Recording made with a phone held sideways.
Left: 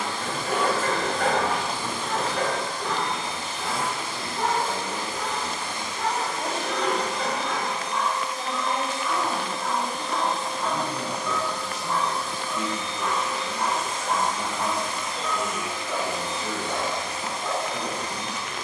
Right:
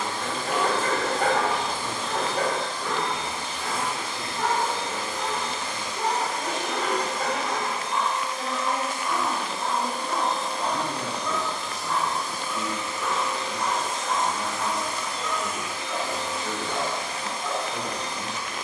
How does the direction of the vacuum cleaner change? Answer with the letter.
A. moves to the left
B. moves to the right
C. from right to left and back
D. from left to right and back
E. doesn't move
D.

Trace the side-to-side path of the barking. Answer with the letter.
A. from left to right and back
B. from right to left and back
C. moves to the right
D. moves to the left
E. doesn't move
A.